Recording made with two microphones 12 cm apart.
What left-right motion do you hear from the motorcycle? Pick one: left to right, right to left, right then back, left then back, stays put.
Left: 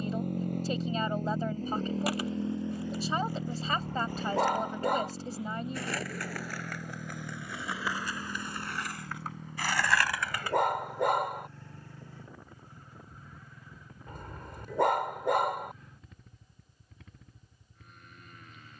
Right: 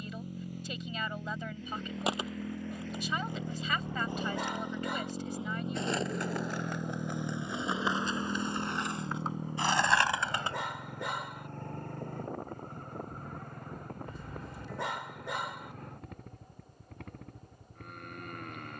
left to right.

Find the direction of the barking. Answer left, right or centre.
left.